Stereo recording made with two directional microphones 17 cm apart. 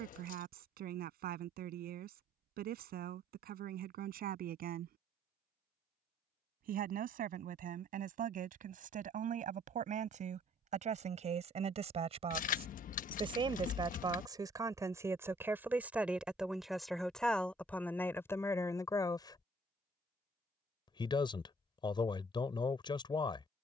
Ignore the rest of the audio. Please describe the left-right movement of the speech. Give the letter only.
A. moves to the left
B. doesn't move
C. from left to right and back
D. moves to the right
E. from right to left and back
A.